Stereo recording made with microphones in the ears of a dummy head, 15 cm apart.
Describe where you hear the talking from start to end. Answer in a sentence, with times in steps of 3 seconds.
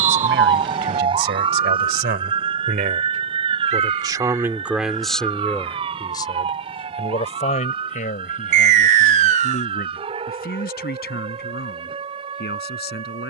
You can hear the talking on the right from 0 s, in the centre from 3 s and on the left from 6 s.